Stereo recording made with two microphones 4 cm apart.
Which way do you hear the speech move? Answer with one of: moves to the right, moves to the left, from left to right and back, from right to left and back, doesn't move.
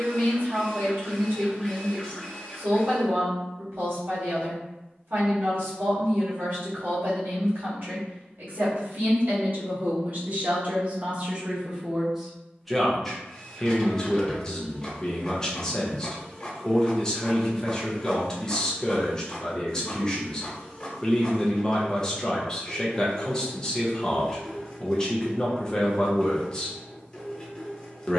moves to the left.